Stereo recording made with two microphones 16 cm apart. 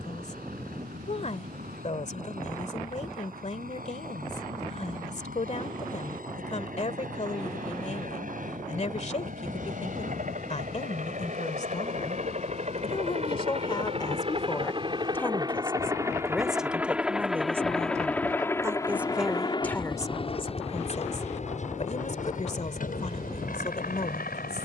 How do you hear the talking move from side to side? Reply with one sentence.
You can hear the talking move from left to right and back again.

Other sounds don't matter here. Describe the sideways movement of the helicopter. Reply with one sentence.
In this clip you hear the helicopter go from the right side to the left.